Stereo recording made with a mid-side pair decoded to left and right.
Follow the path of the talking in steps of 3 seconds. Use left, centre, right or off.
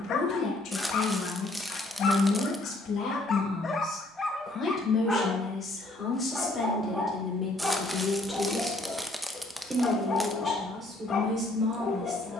left, left, centre, right.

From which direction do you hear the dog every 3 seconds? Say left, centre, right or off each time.
left, centre, centre, left.